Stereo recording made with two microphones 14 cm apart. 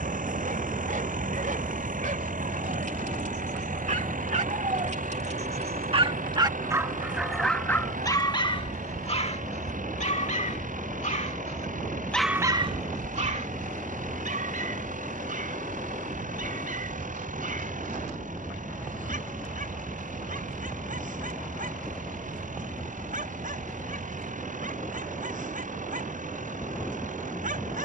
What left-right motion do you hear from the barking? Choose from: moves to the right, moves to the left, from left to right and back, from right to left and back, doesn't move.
from right to left and back.